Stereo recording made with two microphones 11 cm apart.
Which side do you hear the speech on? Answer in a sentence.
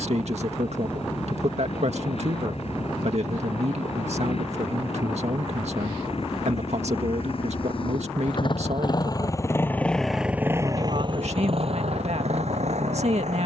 In this clip you hear the speech on the right.